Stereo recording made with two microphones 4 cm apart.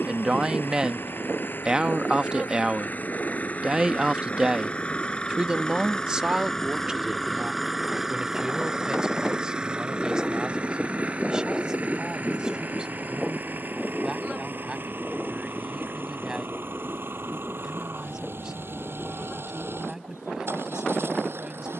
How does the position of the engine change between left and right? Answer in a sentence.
In this clip you hear the engine travel towards the right.